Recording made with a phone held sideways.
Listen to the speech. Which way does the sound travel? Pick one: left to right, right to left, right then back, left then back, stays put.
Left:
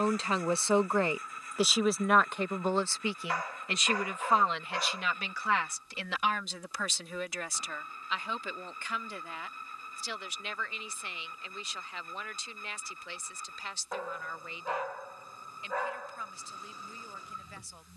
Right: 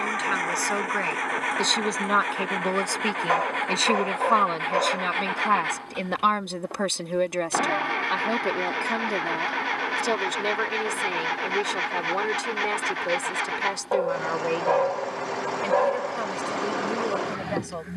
left to right.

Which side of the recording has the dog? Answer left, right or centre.
right.